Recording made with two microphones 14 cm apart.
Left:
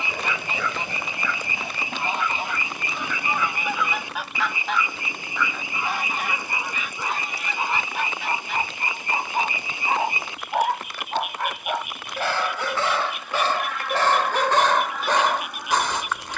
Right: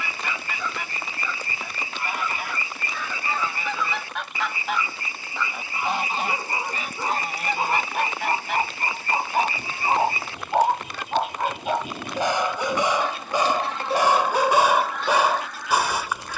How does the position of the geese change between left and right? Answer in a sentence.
You can hear the geese move from left to right and back again.